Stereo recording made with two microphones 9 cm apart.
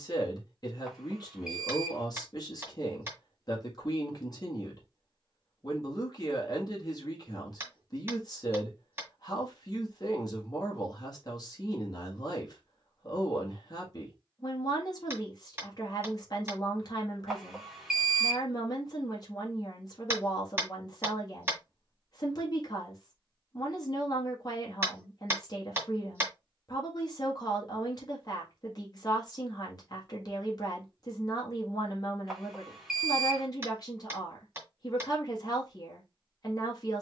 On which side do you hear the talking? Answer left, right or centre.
left.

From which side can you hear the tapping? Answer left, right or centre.
right.